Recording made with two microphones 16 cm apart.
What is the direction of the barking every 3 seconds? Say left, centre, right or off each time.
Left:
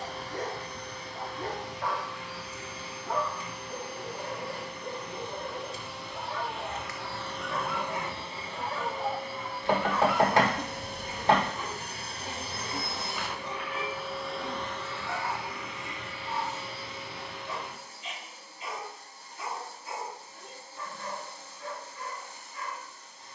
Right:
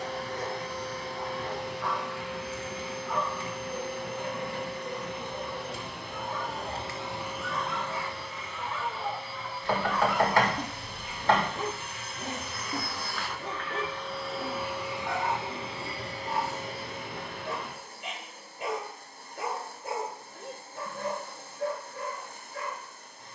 left, left, left, centre, right, right, right, right.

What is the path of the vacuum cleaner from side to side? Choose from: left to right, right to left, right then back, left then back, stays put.
left then back.